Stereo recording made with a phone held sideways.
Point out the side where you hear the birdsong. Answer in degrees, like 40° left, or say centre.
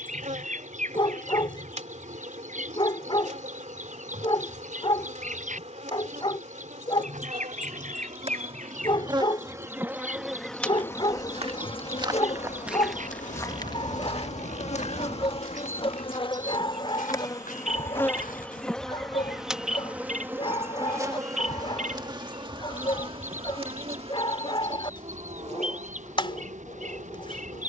60° right.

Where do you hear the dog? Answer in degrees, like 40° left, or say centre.
40° left.